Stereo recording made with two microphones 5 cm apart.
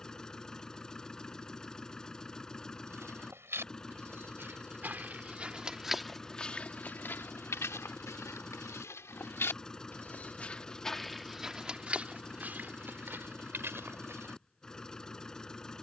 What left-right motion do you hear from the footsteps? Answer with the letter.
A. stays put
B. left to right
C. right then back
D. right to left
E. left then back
E.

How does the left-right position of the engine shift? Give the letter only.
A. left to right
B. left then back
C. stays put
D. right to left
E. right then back
C.